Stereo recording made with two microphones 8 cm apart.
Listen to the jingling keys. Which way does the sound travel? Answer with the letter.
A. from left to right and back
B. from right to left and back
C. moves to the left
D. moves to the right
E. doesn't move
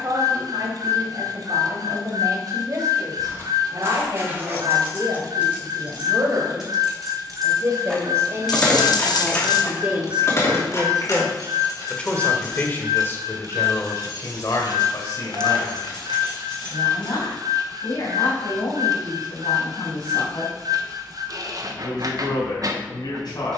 C.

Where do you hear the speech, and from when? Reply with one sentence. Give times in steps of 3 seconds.
You can hear the speech on the right from 0 s, in the centre from 9 s and on the left from 12 s.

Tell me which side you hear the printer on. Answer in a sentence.
In this clip you hear the printer on the right.